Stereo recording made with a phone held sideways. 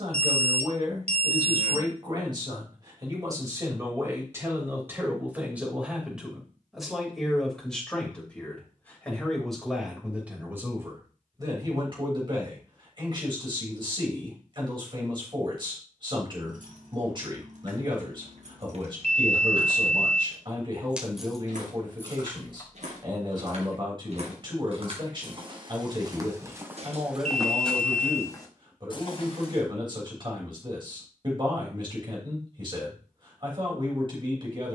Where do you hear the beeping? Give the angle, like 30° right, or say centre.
50° right.